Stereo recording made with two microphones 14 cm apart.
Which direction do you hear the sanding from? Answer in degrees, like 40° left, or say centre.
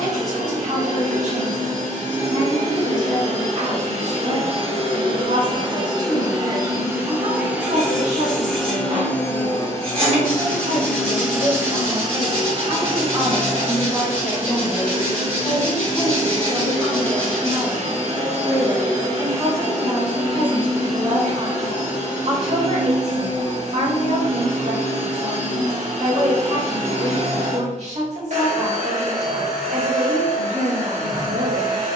40° right.